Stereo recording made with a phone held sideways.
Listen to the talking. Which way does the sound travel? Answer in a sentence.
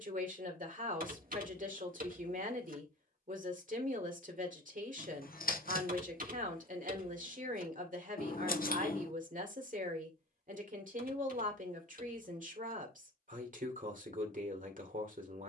You can hear the talking stay in one place.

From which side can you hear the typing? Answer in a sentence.
You can hear the typing on the right.